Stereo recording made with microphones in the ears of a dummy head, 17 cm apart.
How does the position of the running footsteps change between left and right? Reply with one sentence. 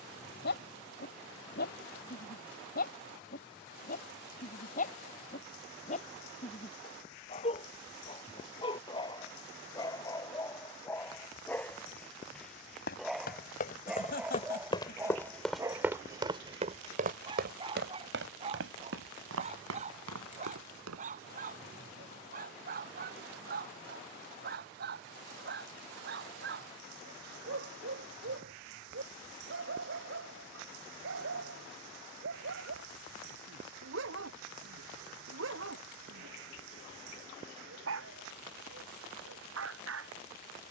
You can hear the running footsteps travel towards the right.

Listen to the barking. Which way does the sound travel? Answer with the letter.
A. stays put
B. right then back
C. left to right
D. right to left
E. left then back
C.